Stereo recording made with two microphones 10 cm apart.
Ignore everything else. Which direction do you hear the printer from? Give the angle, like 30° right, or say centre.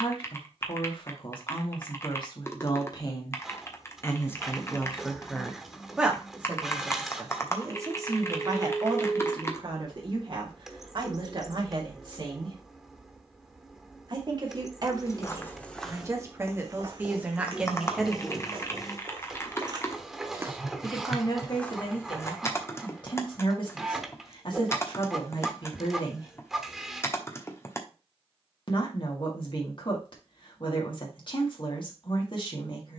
centre.